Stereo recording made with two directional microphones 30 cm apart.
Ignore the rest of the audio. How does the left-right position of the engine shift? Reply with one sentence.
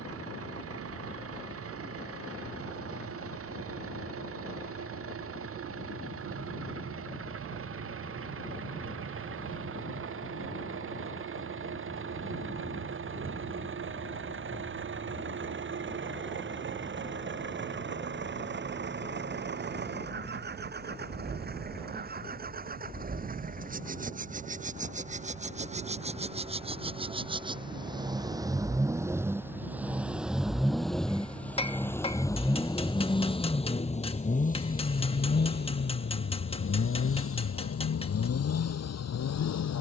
In this clip you hear the engine go from the right side to the left.